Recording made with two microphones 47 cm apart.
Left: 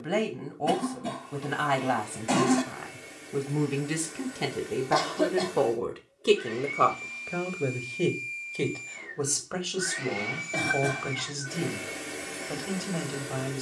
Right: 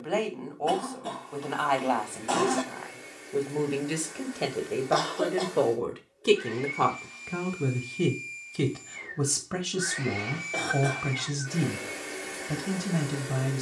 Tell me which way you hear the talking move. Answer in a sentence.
You can hear the talking move from left to right.